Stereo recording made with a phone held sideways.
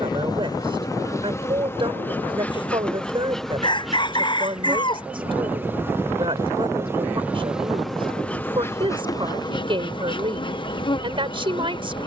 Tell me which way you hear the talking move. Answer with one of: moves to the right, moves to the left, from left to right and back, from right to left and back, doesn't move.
doesn't move.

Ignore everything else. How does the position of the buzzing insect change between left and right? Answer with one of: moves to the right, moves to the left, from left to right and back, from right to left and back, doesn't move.
from left to right and back.